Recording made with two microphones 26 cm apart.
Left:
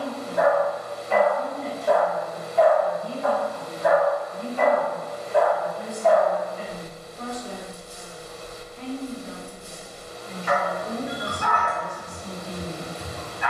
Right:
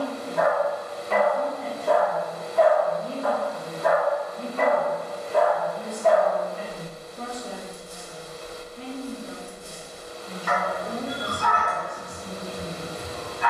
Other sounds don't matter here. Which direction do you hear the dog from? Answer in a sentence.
You can hear the dog on the right.